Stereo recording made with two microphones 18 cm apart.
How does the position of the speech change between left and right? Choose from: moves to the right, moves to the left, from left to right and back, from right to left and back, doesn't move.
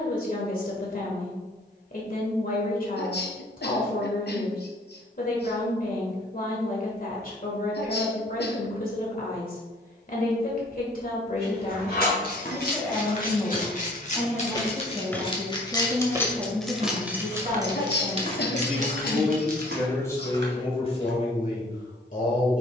from left to right and back.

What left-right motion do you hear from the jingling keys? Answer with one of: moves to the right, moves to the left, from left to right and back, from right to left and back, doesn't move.
moves to the right.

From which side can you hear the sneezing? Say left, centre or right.
left.